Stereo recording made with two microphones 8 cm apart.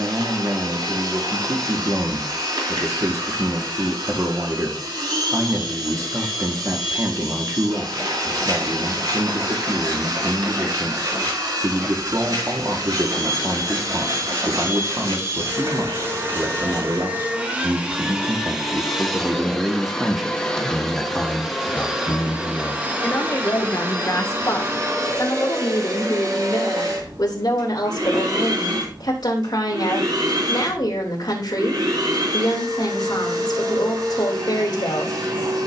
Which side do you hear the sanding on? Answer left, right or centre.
right.